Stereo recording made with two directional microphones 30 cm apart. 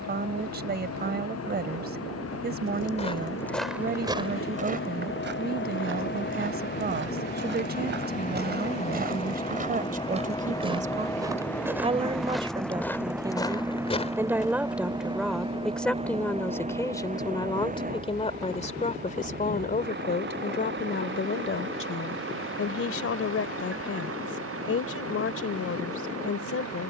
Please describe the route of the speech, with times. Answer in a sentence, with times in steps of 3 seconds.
You can hear the speech on the right from 0 s, in the centre from 12 s and on the left from 18 s.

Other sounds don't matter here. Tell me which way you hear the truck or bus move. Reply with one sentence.
You can hear the truck or bus travel towards the right.